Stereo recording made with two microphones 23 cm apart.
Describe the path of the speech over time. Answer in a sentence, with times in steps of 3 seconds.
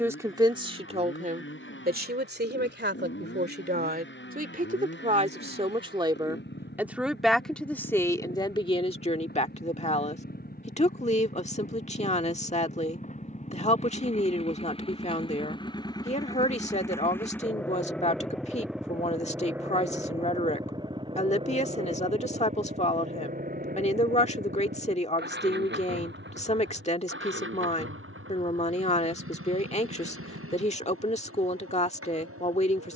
In this clip you hear the speech on the right from 0 s, in the centre from 6 s and on the left from 9 s.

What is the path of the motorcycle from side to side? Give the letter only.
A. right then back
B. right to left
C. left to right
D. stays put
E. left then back
C.